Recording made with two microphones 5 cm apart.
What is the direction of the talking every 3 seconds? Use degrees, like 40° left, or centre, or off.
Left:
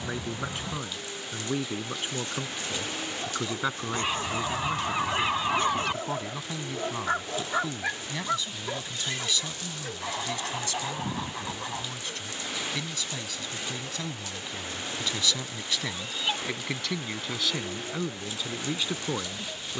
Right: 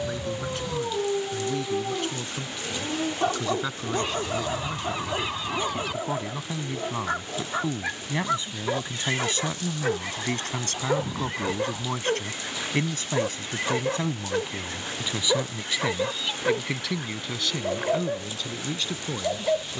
20° left, 10° left, 20° right, 50° right, 30° right, 10° right, 10° left.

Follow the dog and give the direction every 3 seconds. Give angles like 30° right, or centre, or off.
70° right, 40° right, centre, 60° right, 70° right, 70° right, 70° right.